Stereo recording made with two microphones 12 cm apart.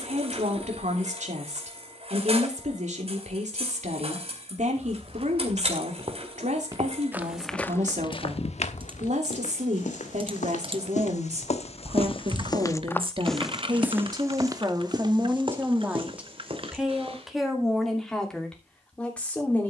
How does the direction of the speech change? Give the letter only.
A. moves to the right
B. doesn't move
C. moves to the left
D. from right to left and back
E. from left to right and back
C.